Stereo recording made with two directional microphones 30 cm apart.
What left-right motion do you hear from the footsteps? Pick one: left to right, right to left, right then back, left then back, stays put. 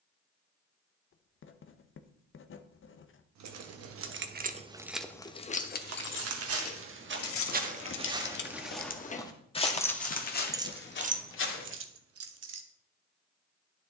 right to left.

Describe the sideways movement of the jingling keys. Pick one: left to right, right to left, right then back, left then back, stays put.
left then back.